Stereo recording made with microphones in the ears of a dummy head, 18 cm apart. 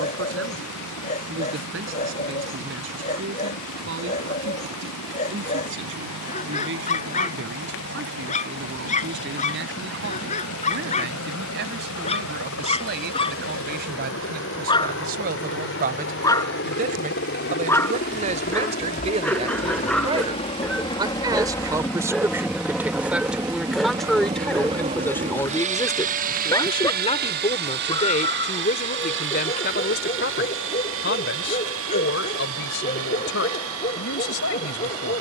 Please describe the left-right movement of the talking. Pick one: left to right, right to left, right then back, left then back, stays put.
right to left.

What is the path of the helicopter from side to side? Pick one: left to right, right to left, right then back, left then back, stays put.
left to right.